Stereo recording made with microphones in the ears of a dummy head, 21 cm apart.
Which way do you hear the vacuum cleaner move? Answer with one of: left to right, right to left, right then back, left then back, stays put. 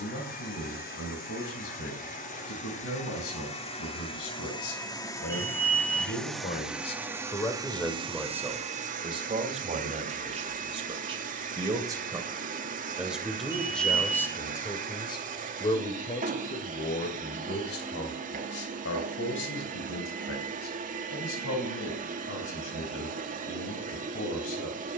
left to right.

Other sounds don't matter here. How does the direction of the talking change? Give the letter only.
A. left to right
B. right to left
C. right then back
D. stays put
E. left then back
C.